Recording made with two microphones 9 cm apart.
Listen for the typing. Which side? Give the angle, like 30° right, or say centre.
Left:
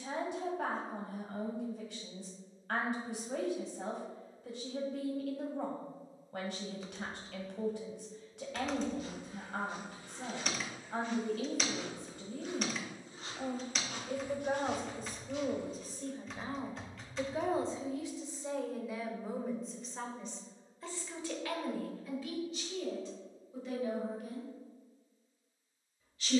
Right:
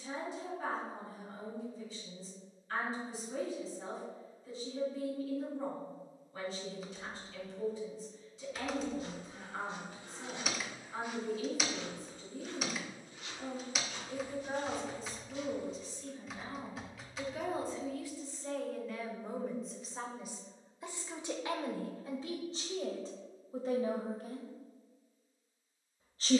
centre.